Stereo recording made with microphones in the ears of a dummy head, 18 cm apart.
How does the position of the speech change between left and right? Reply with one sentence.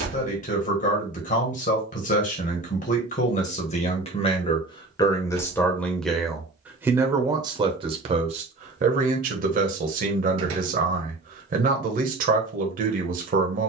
In this clip you hear the speech move from left to right.